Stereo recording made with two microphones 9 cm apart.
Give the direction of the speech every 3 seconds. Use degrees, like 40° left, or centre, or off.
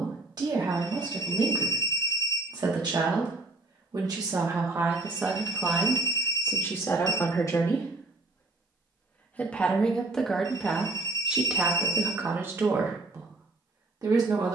50° right, 30° right, 30° left, centre, 40° right.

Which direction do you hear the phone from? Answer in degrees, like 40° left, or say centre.
60° left.